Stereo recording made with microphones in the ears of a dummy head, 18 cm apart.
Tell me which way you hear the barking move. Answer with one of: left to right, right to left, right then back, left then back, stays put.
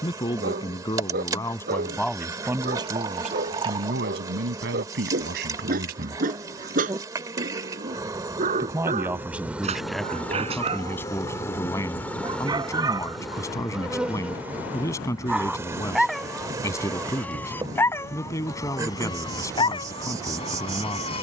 right to left.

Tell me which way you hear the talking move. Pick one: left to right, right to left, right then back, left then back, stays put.
right then back.